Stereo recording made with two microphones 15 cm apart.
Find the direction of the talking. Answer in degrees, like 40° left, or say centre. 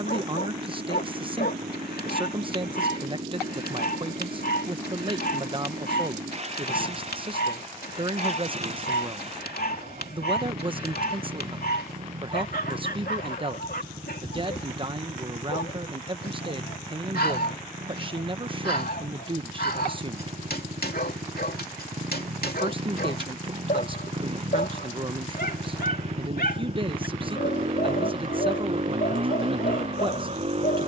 30° right.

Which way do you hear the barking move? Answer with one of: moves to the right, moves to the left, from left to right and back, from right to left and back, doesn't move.
doesn't move.